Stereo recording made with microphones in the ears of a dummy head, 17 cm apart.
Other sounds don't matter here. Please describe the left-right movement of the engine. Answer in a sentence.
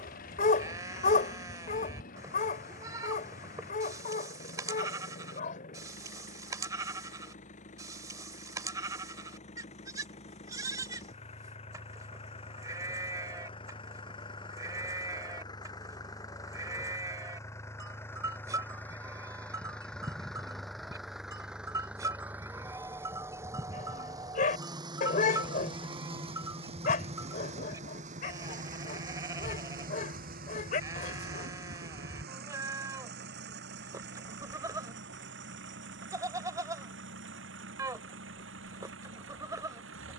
In this clip you hear the engine go from the left side to the right.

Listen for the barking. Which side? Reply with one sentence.
In this clip you hear the barking on the left.